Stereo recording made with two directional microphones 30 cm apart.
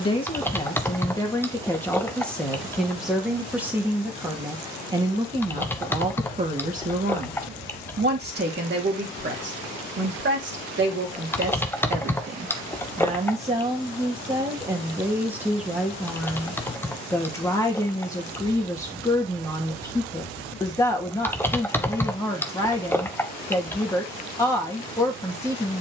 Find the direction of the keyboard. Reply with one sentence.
You can hear the keyboard in the centre.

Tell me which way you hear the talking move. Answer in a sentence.
You can hear the talking go right and come back.